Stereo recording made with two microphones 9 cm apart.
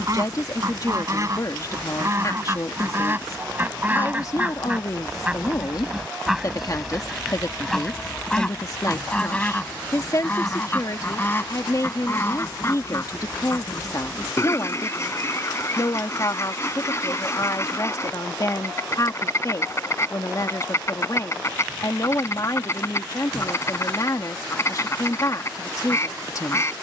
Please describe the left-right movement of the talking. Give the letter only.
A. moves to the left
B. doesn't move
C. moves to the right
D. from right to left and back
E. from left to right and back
B.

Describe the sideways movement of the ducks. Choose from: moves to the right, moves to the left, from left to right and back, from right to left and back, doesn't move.
moves to the left.